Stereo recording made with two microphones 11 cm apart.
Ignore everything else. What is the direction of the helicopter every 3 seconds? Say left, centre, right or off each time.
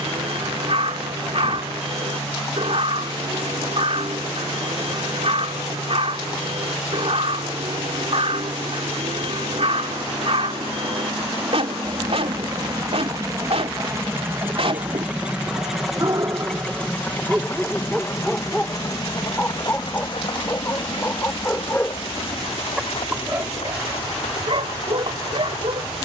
right, right, right, right, right, centre, left, left, left.